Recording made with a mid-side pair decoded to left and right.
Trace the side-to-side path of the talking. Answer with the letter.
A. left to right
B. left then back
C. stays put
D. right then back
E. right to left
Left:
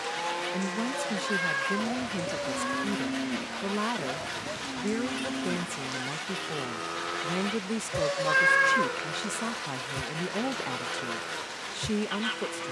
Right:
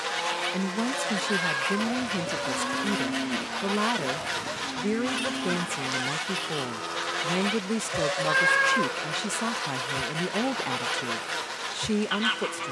C.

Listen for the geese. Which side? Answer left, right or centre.
right.